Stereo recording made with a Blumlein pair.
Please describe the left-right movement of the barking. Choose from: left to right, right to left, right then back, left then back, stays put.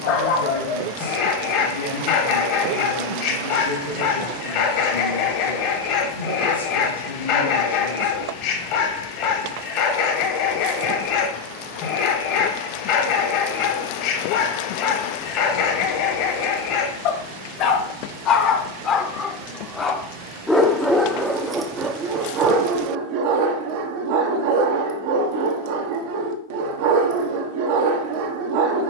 left to right.